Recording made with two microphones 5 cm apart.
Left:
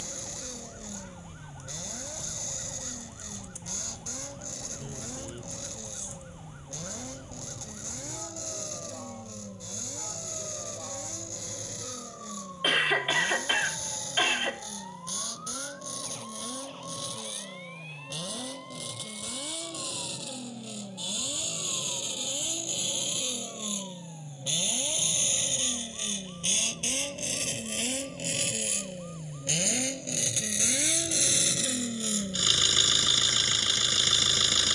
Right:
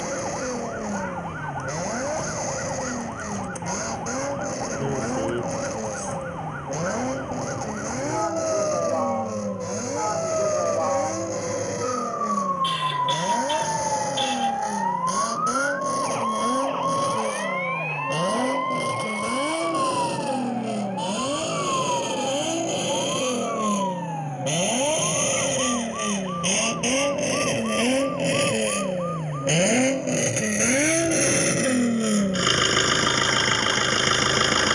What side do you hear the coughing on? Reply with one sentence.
You can hear the coughing on the left.